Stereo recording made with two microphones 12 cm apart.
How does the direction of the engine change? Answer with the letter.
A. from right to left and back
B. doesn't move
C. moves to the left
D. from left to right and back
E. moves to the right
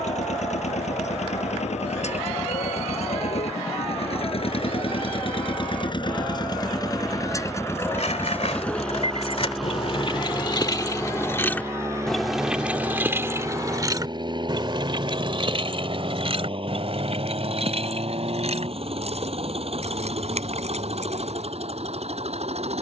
E.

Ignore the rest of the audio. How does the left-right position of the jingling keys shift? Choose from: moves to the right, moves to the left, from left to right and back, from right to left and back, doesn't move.
moves to the right.